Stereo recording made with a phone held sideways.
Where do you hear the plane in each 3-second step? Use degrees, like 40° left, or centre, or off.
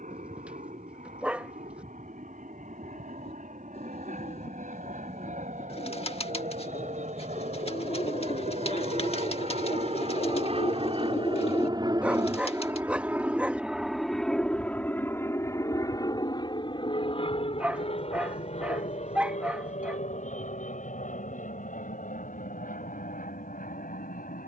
80° right, 80° right, 70° right, 50° right, 10° right, 30° left, 50° left, 60° left.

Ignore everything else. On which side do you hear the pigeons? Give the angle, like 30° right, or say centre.
40° left.